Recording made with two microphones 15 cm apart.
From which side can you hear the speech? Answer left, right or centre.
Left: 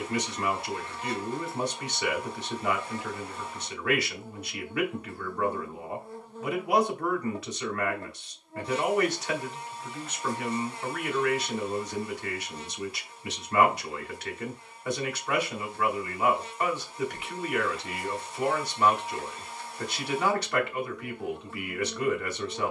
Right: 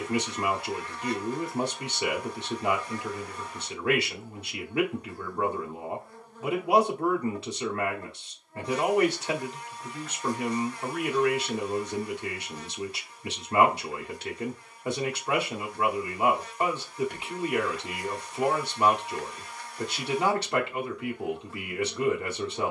right.